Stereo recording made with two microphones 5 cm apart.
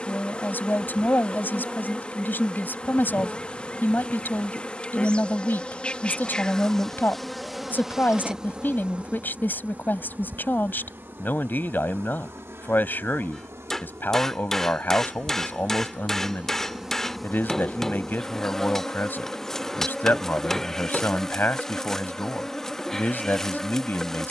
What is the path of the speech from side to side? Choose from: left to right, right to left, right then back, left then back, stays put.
stays put.